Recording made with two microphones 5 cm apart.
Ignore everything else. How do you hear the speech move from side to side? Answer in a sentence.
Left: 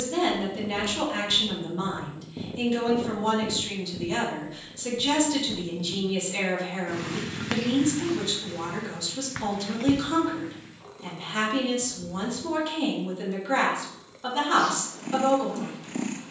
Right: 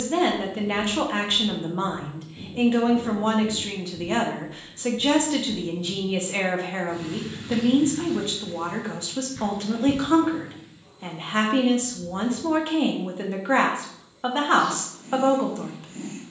You can hear the speech stay in one place.